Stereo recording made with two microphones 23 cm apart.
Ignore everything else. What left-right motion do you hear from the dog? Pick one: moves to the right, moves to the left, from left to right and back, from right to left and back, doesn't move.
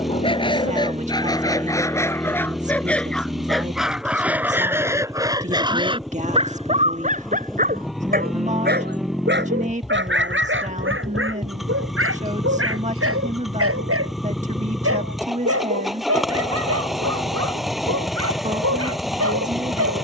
moves to the right.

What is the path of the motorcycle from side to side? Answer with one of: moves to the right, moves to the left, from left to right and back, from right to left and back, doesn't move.
doesn't move.